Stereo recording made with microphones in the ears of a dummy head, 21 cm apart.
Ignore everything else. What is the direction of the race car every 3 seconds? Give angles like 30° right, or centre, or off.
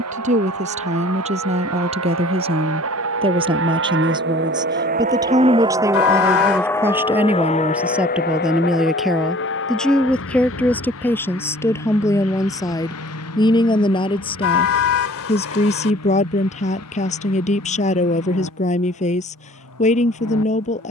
80° right, 50° right, 20° left, 60° left, 70° left, 70° left, 70° left.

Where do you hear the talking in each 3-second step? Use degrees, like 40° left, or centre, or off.
30° right, 20° right, 10° right, 10° left, 20° left, 30° left, 30° left.